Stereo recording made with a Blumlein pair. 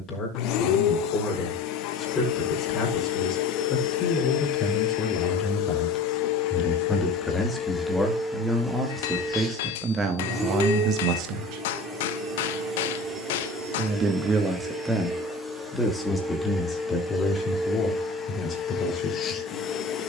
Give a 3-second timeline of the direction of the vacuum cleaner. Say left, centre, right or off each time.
left, left, left, centre, centre, centre, left.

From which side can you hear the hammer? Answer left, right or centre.
left.